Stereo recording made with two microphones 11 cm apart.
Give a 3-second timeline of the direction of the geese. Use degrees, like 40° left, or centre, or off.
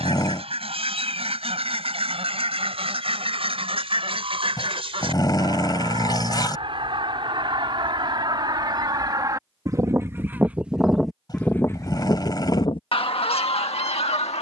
60° right, 60° right, 50° right, 10° right, 60° left.